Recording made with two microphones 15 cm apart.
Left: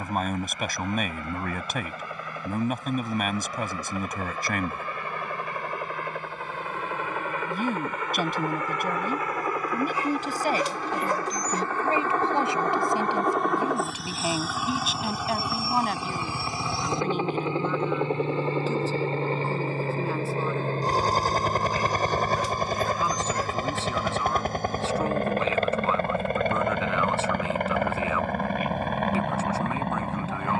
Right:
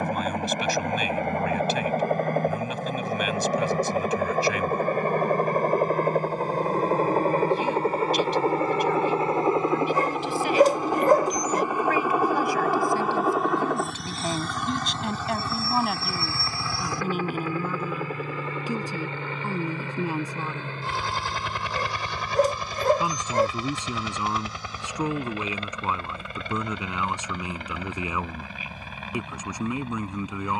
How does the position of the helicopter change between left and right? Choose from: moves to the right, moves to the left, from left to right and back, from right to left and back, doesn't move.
moves to the left.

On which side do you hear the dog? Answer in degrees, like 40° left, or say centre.
50° right.